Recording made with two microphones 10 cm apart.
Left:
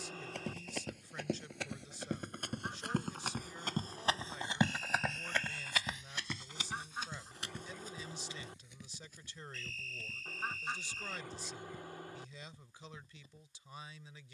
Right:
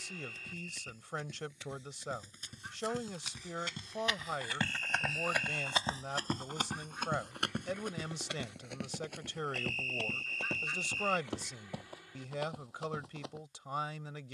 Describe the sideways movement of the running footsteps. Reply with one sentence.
You can hear the running footsteps move from left to right.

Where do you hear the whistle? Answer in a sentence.
In this clip you hear the whistle on the right.